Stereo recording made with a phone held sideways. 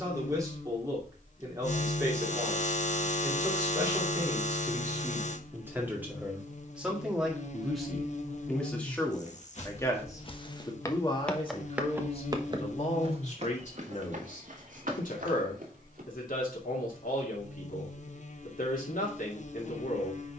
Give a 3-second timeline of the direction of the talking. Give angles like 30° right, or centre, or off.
20° right, 20° right, centre, 30° left, 50° left, 70° left, 70° left.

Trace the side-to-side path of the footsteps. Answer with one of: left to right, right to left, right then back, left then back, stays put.
left to right.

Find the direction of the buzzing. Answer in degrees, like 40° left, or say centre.
50° left.